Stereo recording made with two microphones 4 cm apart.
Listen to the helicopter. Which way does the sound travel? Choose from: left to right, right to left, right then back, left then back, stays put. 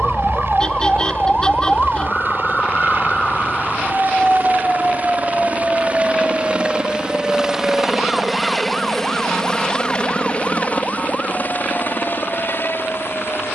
right to left.